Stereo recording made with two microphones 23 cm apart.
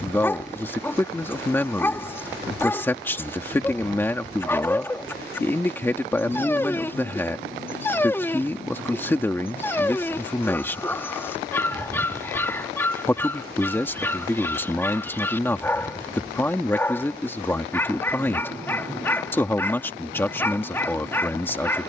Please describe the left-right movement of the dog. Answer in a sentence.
You can hear the dog stay in one place.